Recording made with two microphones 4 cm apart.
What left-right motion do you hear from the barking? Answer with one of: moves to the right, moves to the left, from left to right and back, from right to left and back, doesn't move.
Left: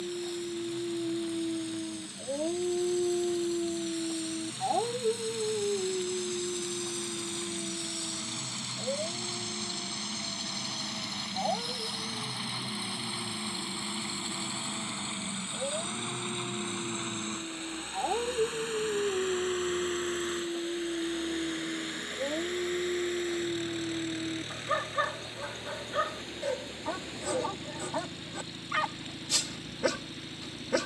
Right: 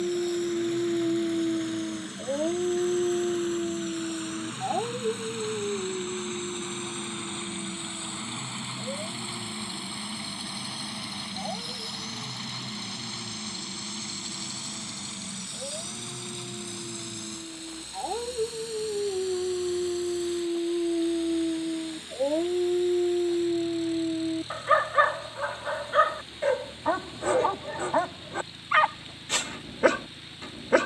from right to left and back.